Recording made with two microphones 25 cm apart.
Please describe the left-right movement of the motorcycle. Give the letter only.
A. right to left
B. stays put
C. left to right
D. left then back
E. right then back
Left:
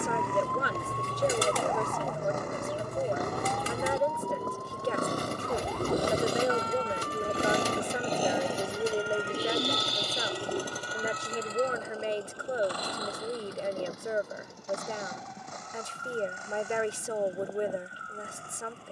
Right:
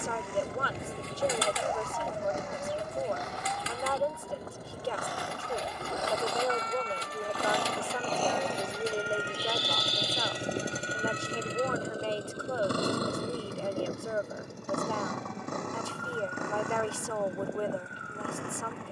C.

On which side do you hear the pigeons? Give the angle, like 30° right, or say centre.
50° left.